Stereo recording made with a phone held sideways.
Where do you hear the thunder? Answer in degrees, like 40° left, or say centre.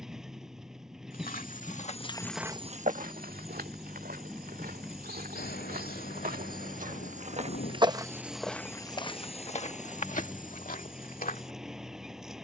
80° left.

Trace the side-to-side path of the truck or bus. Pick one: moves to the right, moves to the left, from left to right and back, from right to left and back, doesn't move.
doesn't move.